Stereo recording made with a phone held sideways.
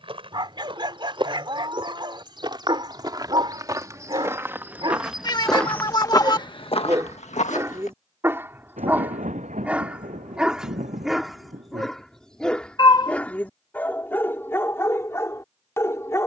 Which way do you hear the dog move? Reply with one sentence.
In this clip you hear the dog travel towards the left.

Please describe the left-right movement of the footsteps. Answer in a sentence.
You can hear the footsteps travel towards the left.